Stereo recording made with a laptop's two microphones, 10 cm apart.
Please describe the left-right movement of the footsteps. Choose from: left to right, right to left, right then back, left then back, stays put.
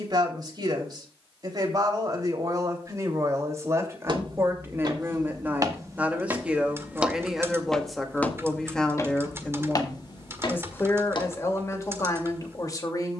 right to left.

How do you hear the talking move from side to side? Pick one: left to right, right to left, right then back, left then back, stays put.
right to left.